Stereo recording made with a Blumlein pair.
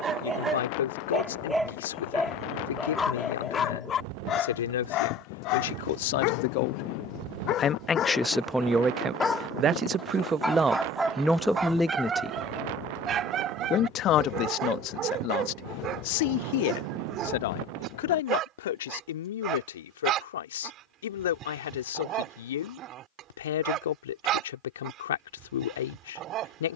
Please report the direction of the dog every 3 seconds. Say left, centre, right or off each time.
centre, left, left, centre, right, right, right, right, right.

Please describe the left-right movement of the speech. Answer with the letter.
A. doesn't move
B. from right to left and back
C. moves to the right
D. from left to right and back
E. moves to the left
D.